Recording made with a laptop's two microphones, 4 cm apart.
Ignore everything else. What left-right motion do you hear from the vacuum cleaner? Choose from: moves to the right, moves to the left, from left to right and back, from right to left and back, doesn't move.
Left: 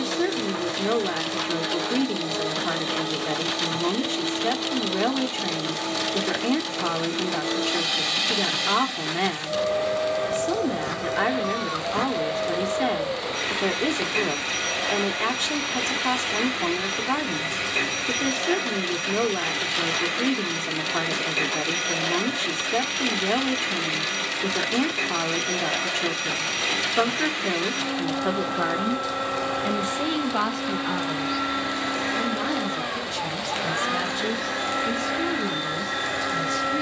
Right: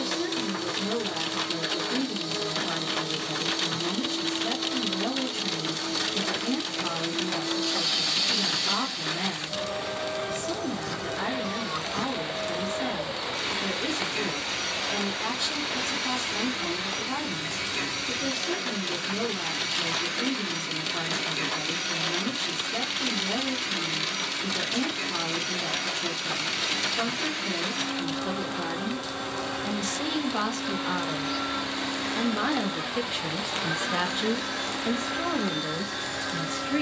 doesn't move.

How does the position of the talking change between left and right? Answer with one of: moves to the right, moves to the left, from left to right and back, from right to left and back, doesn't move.
moves to the right.